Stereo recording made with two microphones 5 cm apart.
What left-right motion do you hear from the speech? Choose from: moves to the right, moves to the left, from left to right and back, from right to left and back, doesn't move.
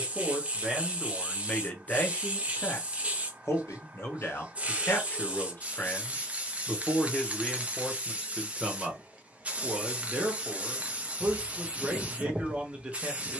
from right to left and back.